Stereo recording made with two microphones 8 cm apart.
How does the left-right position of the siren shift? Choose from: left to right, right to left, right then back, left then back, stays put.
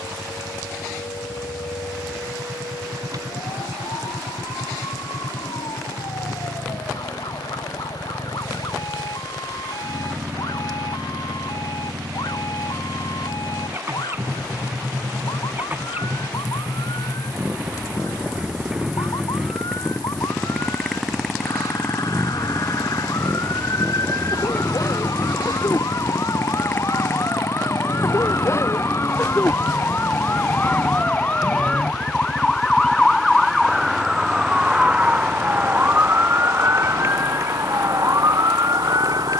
left to right.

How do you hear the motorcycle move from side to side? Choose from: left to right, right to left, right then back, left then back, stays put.
right to left.